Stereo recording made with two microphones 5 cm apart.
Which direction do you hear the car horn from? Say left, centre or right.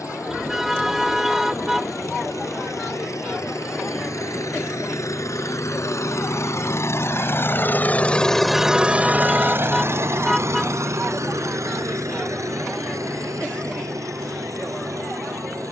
centre.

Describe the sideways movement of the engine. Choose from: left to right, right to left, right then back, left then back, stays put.
left to right.